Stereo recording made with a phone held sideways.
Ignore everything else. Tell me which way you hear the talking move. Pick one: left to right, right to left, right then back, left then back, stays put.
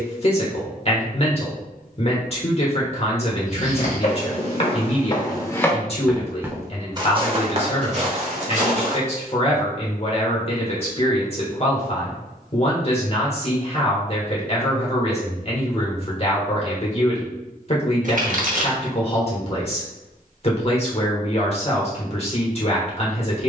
stays put.